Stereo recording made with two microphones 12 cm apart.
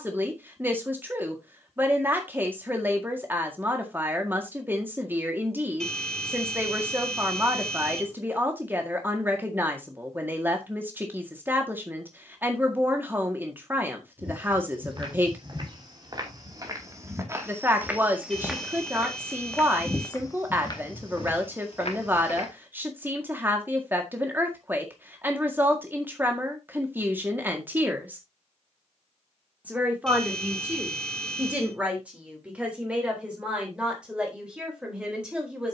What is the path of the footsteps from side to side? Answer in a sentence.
You can hear the footsteps travel towards the left.